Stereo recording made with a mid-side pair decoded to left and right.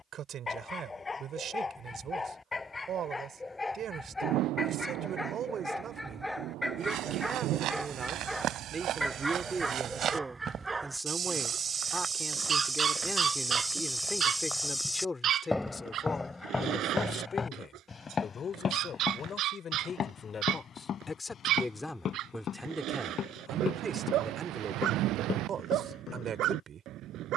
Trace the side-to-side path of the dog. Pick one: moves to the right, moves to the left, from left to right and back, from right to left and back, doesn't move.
moves to the right.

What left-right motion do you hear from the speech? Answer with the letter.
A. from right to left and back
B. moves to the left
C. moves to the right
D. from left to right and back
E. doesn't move
A.